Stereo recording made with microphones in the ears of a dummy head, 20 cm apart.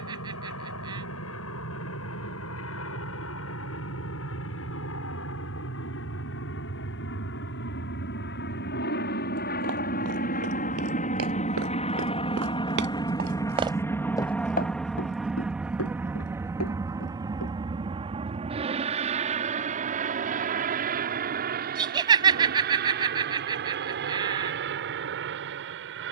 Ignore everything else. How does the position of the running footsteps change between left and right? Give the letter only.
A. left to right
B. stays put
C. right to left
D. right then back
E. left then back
C.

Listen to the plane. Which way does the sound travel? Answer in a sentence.
In this clip you hear the plane move to the right.